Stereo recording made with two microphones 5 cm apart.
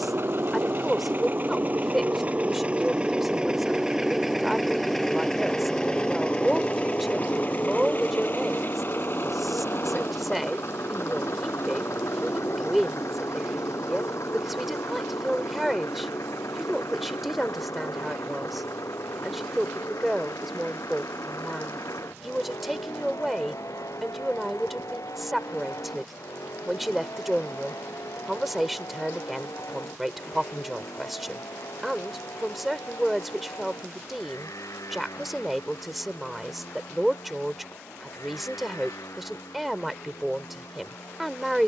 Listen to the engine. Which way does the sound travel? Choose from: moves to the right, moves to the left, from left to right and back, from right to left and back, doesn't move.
moves to the left.